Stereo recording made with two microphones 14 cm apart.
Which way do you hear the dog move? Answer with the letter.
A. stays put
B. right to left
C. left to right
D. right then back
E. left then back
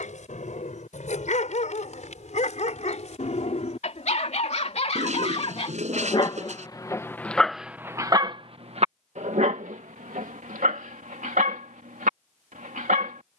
C.